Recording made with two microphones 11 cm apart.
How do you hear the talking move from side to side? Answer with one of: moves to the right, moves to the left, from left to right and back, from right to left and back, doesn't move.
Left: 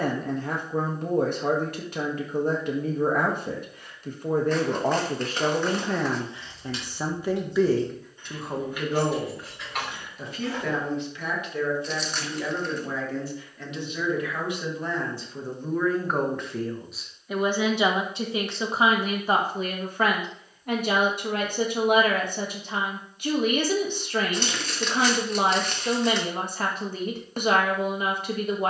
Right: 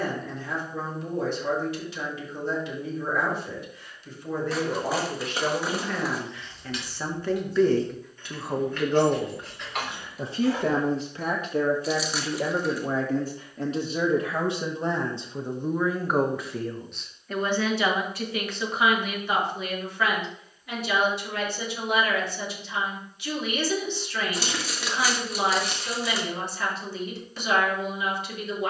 from left to right and back.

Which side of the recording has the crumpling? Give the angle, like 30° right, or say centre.
10° right.